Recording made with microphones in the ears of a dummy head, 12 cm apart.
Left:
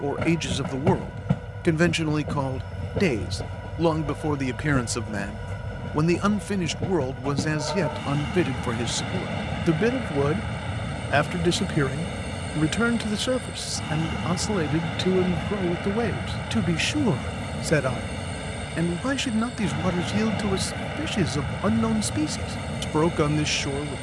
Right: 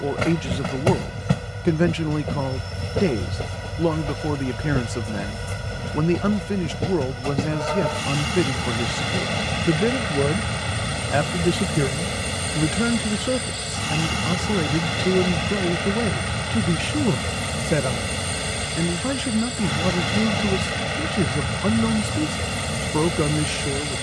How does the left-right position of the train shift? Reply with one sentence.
You can hear the train stay put.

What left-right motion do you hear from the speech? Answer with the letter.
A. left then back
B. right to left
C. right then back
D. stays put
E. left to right
D.